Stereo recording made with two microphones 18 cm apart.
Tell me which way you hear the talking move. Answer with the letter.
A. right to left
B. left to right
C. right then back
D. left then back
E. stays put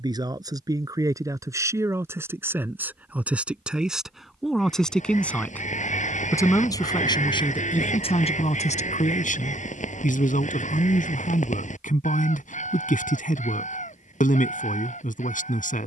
A.